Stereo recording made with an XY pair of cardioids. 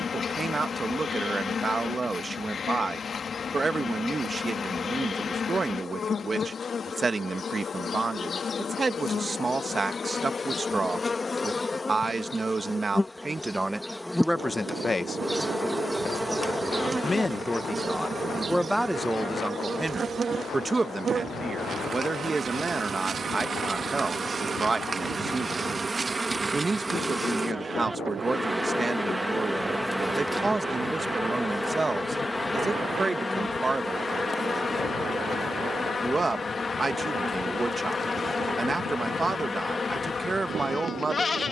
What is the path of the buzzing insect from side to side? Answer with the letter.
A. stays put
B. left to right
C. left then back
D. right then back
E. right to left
D.